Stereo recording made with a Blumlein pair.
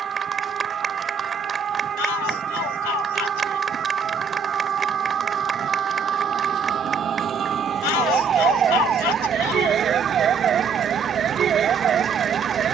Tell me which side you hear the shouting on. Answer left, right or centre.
left.